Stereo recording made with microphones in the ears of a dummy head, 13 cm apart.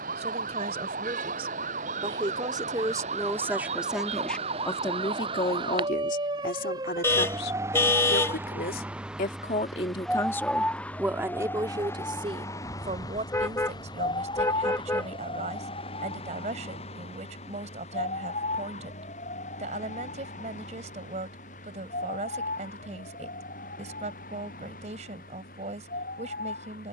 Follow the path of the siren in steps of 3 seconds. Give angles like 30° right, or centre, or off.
60° right, 40° right, 20° right, 10° left, 30° left, 40° left, 50° left, 60° left, 60° left.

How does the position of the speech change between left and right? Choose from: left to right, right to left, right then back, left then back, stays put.
left then back.